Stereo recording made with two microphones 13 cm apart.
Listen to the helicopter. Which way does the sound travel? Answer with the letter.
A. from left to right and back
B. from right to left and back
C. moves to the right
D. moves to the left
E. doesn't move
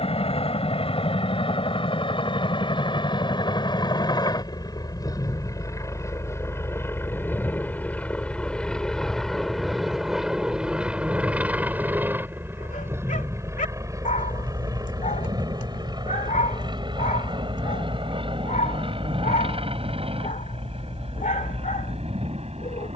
C.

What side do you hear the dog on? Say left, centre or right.
left.